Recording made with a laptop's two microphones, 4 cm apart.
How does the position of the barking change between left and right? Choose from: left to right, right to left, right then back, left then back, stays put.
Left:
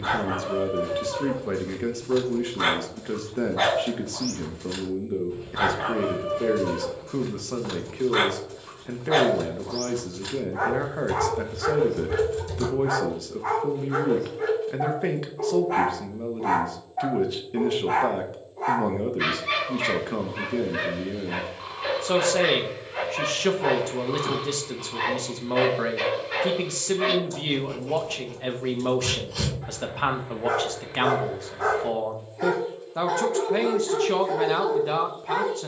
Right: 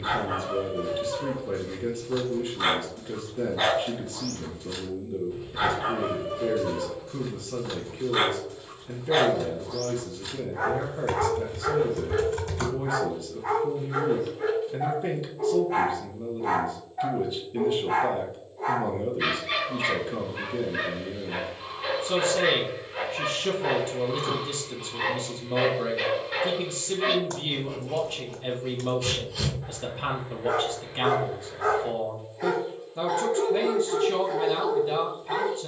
stays put.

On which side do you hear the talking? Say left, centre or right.
left.